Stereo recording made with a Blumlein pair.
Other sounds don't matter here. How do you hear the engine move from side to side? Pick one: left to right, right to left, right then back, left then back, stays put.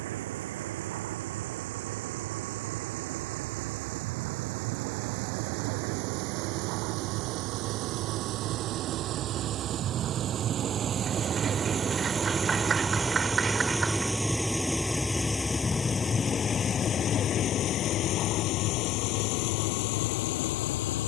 right to left.